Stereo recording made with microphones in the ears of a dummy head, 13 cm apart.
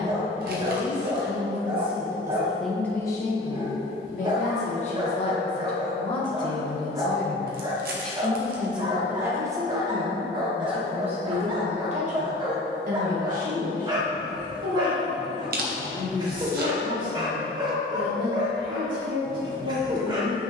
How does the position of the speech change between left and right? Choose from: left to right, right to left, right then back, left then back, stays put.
left then back.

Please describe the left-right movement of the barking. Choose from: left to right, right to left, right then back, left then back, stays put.
stays put.